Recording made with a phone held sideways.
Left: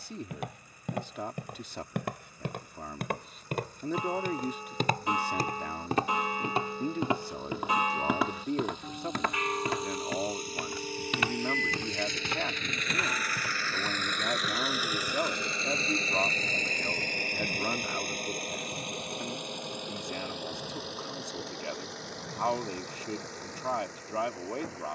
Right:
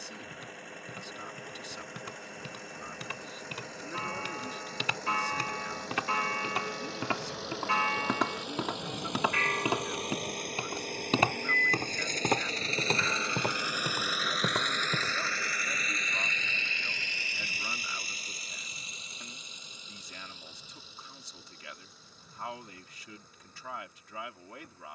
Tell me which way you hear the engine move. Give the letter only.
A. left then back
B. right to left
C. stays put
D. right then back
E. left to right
B.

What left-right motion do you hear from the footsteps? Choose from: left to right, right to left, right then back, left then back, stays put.
left to right.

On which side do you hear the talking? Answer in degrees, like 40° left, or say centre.
50° left.